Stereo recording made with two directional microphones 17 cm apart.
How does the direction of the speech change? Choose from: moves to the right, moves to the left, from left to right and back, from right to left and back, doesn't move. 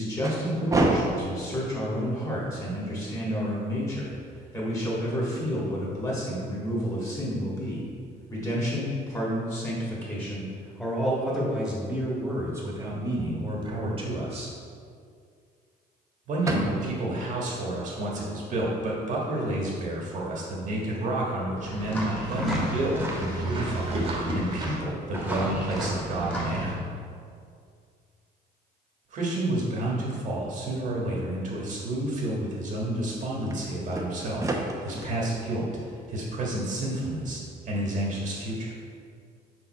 moves to the right.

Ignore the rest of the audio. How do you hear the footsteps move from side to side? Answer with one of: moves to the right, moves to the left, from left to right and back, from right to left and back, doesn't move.
from left to right and back.